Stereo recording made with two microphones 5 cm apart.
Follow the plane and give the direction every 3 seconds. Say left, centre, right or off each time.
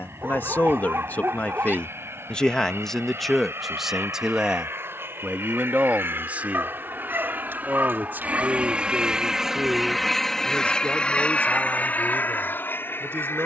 right, right, right, centre, left.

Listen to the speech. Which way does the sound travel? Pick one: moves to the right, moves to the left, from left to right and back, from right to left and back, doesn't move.
moves to the right.